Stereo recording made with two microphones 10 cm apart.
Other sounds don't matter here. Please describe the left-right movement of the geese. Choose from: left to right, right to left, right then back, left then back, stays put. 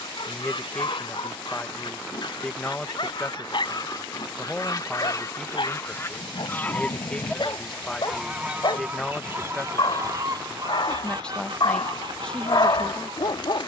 left to right.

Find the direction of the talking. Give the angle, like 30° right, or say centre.
10° left.